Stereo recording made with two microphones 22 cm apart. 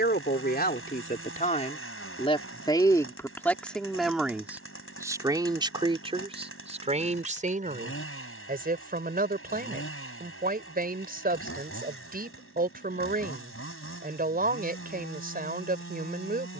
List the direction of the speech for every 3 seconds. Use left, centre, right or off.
left, centre, right, right, right, right.